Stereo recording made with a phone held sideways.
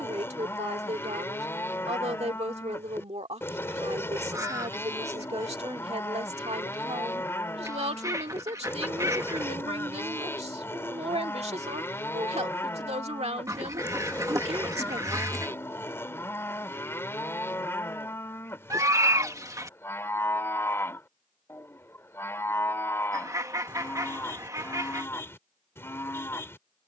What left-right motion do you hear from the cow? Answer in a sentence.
In this clip you hear the cow stay put.